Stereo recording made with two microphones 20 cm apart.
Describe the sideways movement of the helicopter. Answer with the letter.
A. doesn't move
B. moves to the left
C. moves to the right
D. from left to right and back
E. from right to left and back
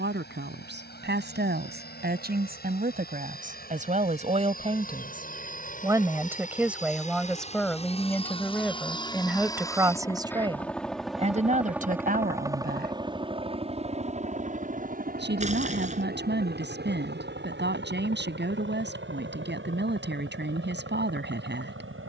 C.